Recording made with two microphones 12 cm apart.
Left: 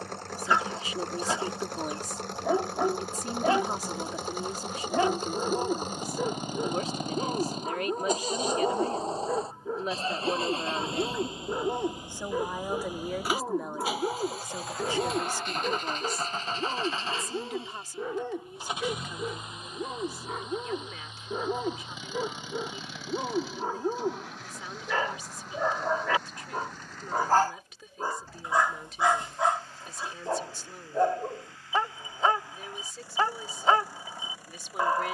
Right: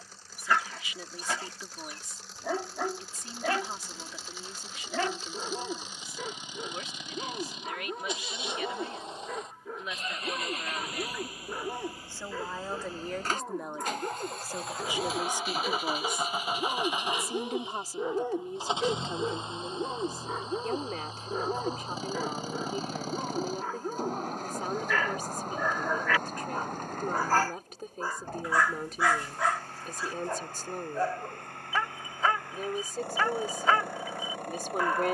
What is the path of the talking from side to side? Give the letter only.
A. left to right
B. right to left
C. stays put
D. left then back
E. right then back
A.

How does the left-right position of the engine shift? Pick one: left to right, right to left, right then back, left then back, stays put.
left to right.